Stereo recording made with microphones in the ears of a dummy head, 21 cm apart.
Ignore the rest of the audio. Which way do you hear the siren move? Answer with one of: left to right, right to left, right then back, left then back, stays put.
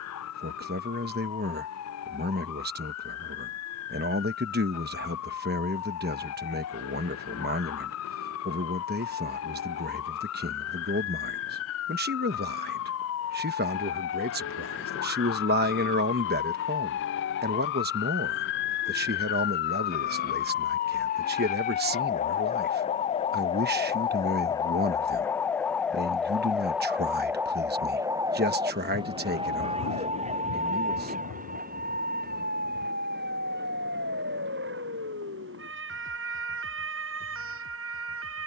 left to right.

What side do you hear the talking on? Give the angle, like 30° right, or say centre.
40° right.